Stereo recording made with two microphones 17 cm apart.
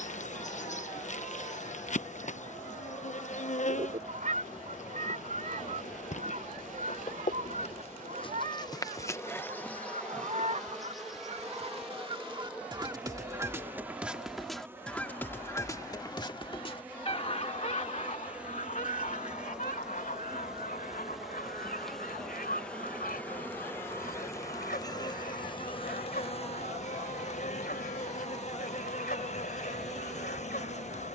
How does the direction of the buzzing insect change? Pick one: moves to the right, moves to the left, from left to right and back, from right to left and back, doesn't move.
from left to right and back.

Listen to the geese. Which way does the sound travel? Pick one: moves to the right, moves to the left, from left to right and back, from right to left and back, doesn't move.
moves to the left.